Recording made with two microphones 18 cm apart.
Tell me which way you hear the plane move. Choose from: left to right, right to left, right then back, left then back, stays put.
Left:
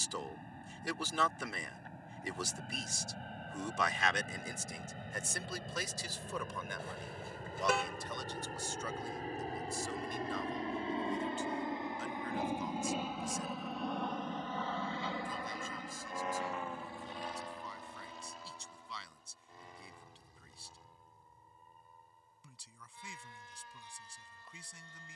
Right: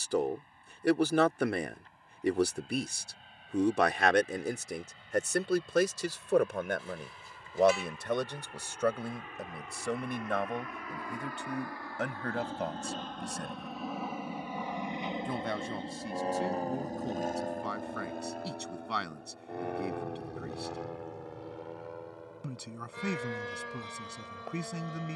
left to right.